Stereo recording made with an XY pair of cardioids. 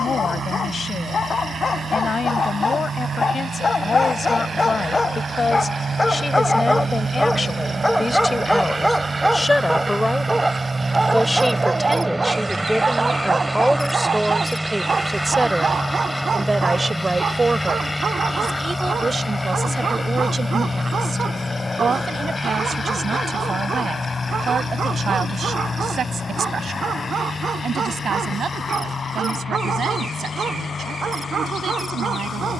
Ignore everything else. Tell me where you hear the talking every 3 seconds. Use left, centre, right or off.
left, left, left, centre, centre, right, right, right, right, right, right.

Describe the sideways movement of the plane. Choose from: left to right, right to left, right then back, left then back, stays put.
right to left.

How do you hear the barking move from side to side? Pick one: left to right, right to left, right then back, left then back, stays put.
left to right.